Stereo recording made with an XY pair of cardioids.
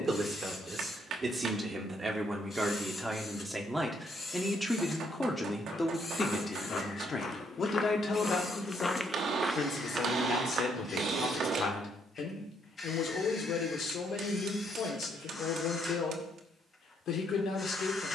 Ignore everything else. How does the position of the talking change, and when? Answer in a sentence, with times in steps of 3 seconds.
You can hear the talking on the right from 0 s, in the centre from 3 s and on the left from 6 s.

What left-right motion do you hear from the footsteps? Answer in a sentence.
In this clip you hear the footsteps go from the left side to the right.